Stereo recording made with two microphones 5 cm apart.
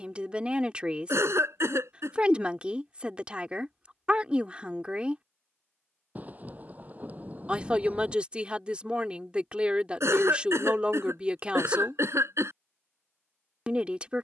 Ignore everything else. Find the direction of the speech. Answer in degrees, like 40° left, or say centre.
20° right.